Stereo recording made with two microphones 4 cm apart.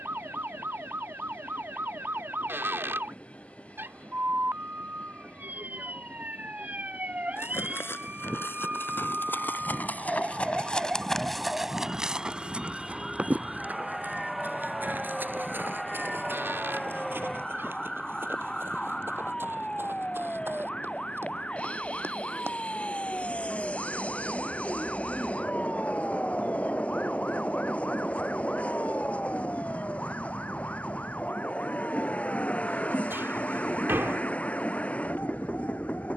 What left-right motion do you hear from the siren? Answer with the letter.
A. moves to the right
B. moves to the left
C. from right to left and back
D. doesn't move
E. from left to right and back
B.